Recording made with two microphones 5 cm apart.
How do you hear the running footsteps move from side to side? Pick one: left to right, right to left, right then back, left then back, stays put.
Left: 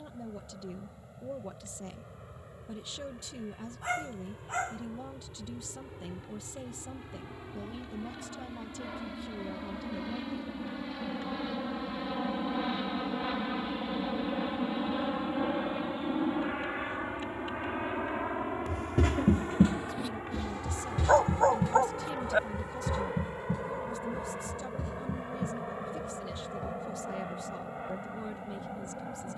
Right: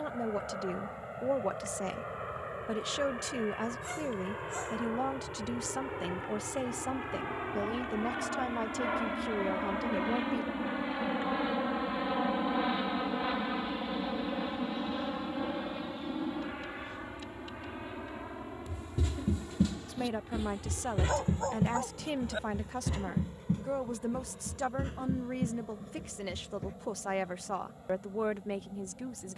left to right.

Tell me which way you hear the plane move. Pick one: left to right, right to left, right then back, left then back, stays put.
right to left.